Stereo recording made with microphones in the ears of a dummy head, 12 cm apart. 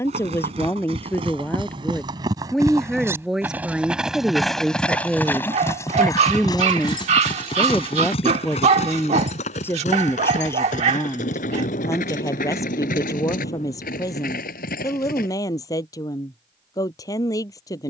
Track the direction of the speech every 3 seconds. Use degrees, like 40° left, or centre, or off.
10° left, centre, 10° left, 20° left, 20° left, 30° left.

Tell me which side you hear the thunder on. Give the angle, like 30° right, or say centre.
60° left.